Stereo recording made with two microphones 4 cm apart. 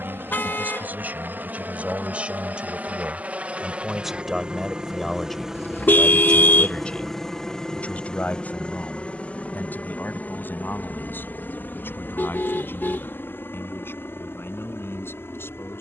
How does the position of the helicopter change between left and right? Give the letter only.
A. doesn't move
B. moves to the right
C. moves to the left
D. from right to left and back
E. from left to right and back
C.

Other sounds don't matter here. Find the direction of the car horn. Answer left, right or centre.
left.